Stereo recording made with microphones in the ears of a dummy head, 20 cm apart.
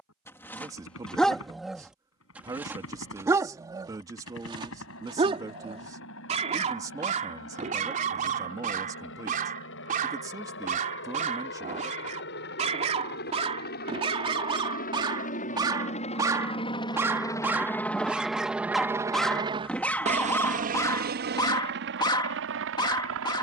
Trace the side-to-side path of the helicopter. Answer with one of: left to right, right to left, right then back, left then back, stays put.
left to right.